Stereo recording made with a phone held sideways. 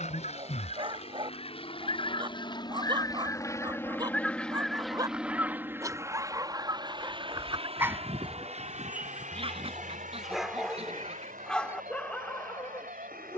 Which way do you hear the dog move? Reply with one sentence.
In this clip you hear the dog travel towards the left.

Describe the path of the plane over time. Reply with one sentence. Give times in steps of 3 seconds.
In this clip you hear the plane on the left from 0 s, in the centre from 3 s and on the right from 6 s.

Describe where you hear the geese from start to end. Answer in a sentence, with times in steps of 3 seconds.
You can hear the geese on the left from 0 s, in the centre from 3 s and on the right from 6 s.